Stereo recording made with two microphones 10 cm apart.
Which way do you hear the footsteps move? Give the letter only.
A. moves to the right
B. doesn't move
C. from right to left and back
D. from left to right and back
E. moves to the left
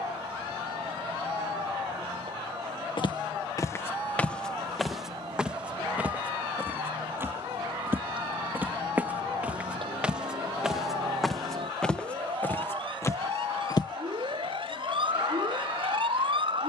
D.